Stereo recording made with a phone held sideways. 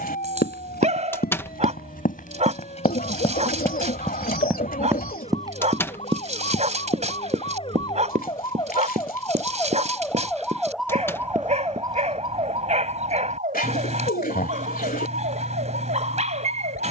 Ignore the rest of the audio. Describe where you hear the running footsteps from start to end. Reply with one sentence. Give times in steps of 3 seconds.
You can hear the running footsteps on the left from 0 s, in the centre from 3 s, on the right from 6 s and not at all from 12 s.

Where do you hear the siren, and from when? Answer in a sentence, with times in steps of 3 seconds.
In this clip you hear the siren on the left from 0 s, in the centre from 9 s and on the right from 12 s.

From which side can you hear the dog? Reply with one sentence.
In this clip you hear the dog on the right.